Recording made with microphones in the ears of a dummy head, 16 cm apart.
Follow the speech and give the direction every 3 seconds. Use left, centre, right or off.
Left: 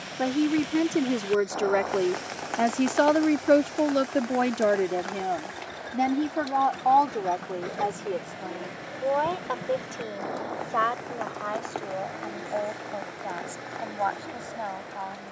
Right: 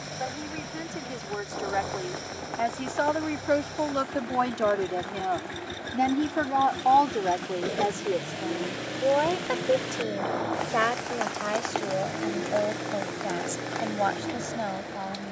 left, left, centre, right, right.